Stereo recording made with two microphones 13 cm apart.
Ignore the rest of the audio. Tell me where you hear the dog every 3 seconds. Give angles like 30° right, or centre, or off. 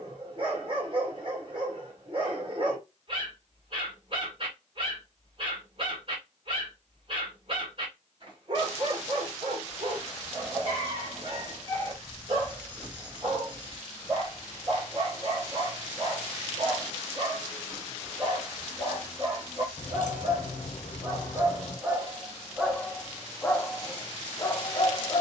40° right, 40° right, 40° right, 40° right, 40° right, 40° right, 40° right, 10° right, 30° left.